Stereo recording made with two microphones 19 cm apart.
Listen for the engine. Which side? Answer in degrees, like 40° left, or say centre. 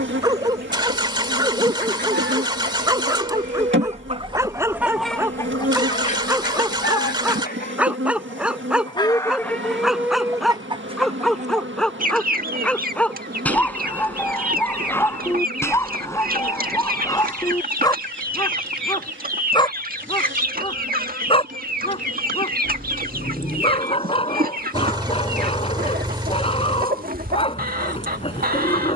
20° right.